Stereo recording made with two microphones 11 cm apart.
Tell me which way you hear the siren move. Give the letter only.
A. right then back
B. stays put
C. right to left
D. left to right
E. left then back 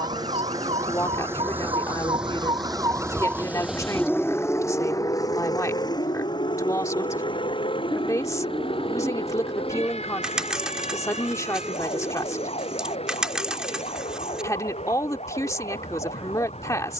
C.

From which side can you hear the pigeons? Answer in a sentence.
In this clip you hear the pigeons in the centre.